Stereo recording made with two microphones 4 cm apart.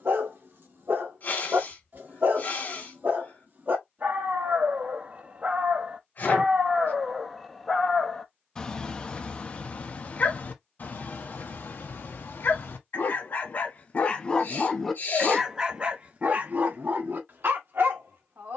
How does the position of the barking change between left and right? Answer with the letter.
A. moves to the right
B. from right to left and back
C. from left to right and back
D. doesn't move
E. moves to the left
B.